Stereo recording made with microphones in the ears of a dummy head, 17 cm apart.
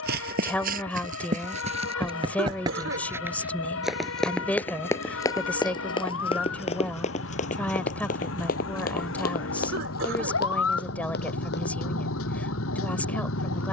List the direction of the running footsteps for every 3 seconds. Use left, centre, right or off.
right, centre, left, left, off.